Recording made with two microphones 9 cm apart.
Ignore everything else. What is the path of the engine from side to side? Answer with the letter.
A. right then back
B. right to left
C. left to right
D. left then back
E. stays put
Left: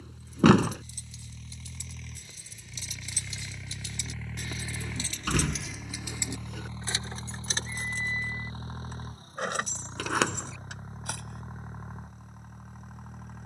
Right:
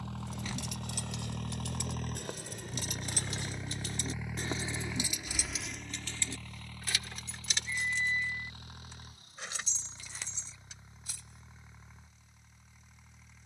B.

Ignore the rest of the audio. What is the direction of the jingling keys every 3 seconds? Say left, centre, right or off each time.
right, right, left, left, off.